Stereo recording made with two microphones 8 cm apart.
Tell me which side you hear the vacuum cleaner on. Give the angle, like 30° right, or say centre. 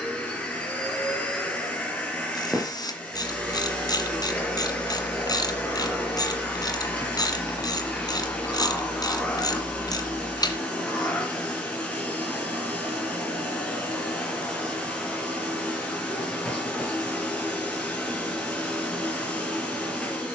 10° left.